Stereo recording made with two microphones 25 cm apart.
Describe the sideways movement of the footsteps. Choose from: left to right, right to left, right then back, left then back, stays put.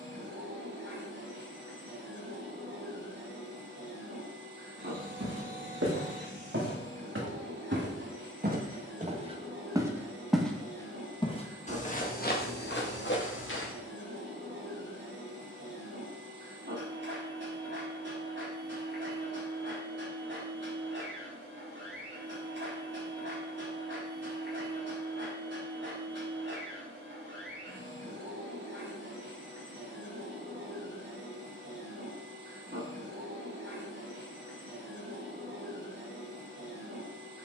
right to left.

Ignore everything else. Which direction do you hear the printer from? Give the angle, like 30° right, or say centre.
50° right.